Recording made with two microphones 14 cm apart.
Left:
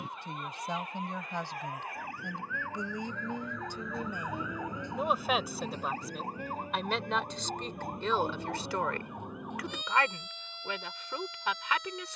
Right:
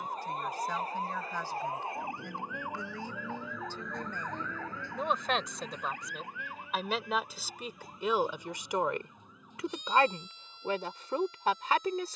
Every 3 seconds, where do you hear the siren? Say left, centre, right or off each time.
right, centre, left, left.